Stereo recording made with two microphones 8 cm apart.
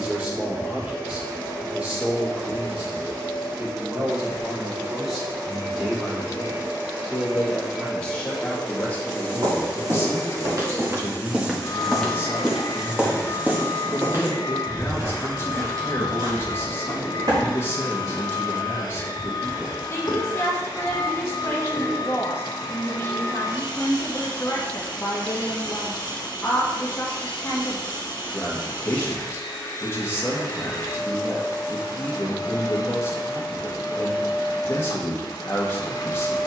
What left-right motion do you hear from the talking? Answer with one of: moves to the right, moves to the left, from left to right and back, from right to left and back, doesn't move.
moves to the left.